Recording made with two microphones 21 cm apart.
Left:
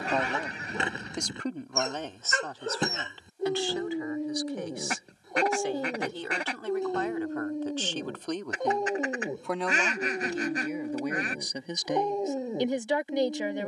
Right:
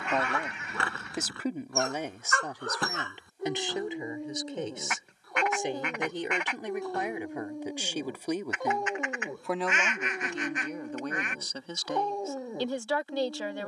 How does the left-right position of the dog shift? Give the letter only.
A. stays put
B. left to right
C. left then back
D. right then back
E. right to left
A.